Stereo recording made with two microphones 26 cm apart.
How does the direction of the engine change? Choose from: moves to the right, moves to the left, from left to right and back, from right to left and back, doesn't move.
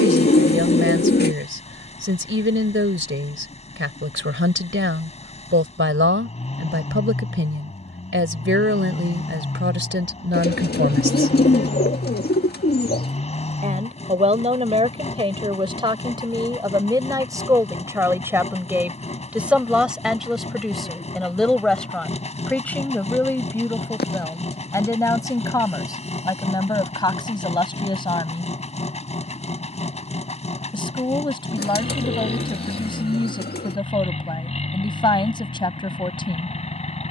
doesn't move.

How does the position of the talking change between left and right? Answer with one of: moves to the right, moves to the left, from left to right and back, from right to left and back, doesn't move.
moves to the left.